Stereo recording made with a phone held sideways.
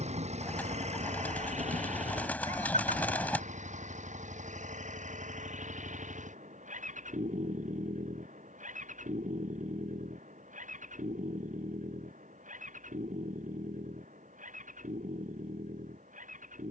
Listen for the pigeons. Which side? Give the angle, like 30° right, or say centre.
10° left.